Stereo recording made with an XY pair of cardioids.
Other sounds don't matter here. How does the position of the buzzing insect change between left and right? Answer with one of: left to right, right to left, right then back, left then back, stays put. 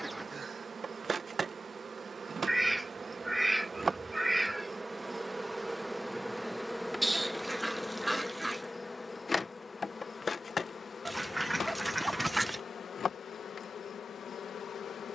right to left.